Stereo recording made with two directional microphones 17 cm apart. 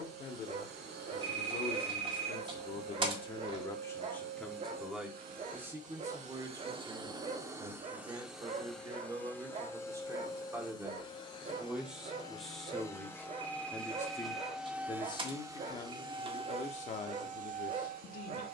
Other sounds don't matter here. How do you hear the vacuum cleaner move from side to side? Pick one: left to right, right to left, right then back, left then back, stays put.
left then back.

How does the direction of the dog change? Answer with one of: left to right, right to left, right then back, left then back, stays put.
stays put.